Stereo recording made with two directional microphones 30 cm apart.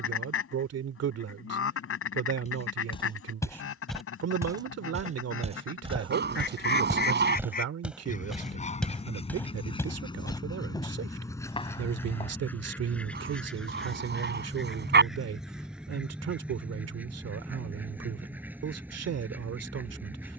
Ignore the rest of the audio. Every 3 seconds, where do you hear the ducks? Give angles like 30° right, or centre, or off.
50° left, 50° left, 30° left, 10° left, centre, centre, 10° right.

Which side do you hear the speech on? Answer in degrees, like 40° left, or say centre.
60° right.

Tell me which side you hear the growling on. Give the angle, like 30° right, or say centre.
40° right.